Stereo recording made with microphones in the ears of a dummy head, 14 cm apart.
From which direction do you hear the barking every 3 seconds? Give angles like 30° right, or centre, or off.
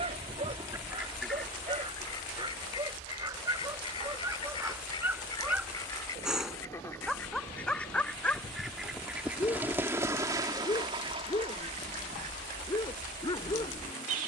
30° right, 10° right, centre, 20° left, 30° left.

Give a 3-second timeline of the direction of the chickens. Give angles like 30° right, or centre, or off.
centre, 30° left, 10° left, 20° right, 50° right.